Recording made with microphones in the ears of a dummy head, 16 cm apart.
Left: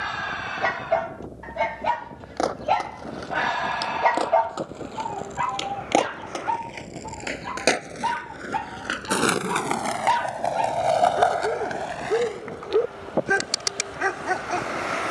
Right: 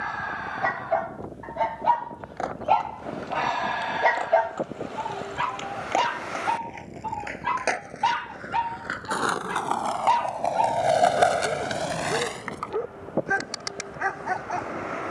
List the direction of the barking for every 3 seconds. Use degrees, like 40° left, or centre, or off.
30° left, 20° right, 60° right, 30° left, 40° left.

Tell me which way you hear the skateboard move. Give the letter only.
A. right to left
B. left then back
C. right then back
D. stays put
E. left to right
E.